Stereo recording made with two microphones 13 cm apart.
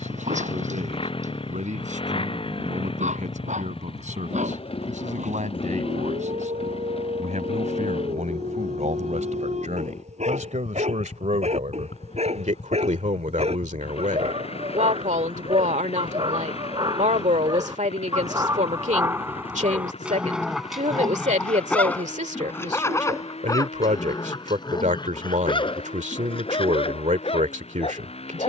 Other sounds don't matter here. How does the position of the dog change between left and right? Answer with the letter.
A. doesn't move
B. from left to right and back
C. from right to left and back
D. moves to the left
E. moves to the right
D.